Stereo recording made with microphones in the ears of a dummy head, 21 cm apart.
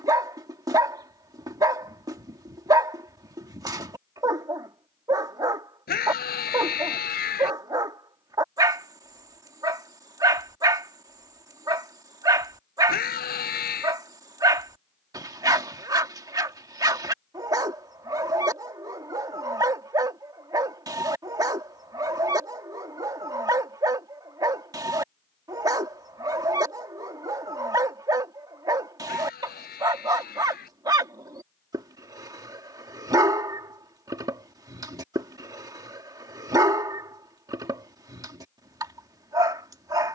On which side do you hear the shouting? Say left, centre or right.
left.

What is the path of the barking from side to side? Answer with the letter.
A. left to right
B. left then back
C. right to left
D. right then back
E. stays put
E.